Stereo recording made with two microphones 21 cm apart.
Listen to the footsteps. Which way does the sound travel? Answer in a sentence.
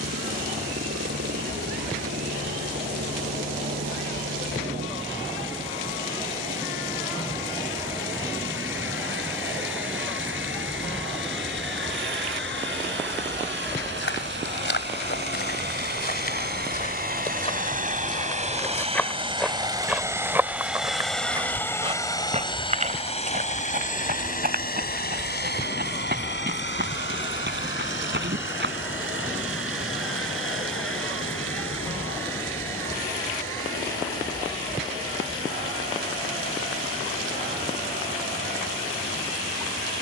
In this clip you hear the footsteps go from the left side to the right.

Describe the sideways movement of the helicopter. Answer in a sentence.
You can hear the helicopter travel towards the left.